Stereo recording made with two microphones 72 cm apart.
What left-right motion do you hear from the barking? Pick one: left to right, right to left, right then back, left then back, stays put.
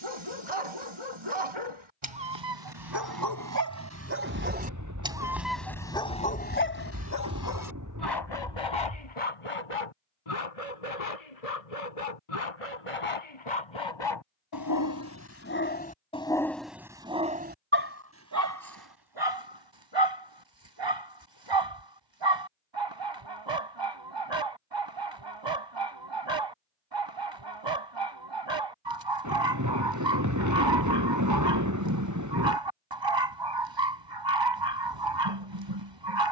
left then back.